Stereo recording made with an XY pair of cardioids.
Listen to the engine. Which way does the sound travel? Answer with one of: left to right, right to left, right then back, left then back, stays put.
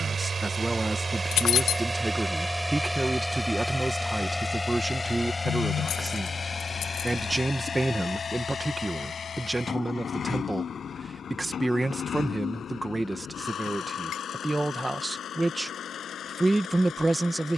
right to left.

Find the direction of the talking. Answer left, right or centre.
centre.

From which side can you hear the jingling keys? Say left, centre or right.
left.